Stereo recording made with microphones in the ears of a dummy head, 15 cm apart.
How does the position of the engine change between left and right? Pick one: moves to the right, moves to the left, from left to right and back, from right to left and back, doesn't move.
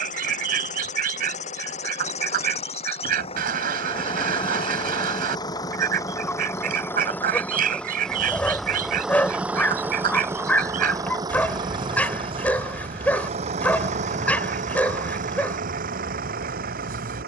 moves to the right.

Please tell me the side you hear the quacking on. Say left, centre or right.
right.